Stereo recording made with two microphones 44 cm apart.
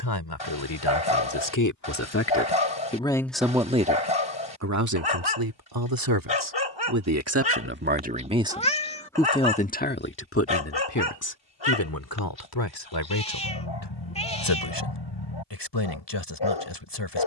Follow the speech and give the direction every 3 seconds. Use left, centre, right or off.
left, right, right, left, left, left.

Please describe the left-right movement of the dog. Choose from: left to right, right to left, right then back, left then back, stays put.
stays put.